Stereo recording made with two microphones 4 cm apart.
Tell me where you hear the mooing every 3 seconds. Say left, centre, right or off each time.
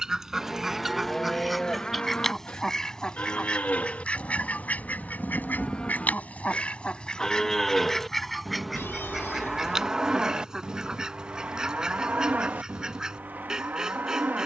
centre, left, centre, right, right.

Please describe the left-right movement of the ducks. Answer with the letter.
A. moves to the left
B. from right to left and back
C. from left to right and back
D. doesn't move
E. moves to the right
B.